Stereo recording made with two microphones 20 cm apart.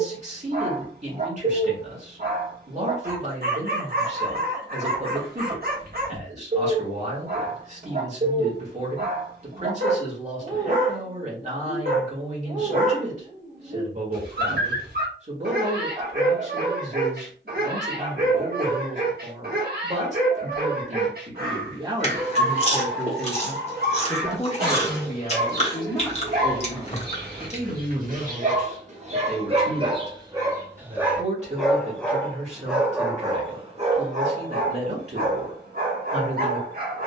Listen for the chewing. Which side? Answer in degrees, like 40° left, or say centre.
30° left.